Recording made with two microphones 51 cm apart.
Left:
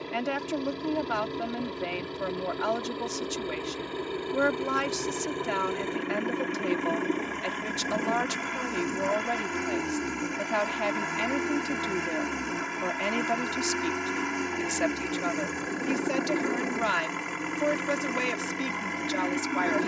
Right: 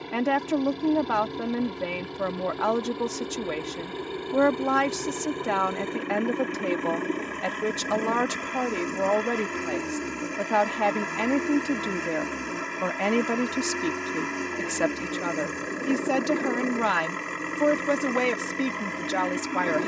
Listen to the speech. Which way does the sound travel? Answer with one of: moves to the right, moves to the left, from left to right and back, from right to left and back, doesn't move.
doesn't move.